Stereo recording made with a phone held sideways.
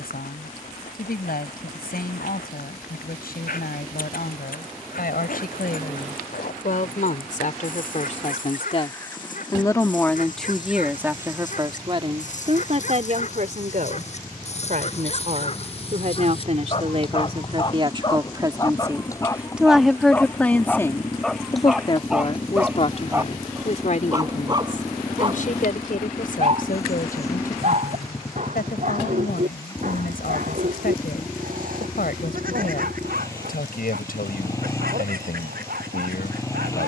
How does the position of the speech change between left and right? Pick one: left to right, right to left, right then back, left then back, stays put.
right then back.